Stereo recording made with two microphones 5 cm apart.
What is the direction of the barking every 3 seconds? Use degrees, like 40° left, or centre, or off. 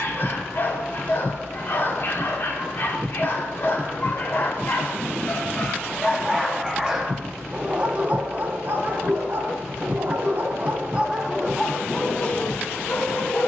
50° left, 40° left, 20° right, 30° right, 40° left.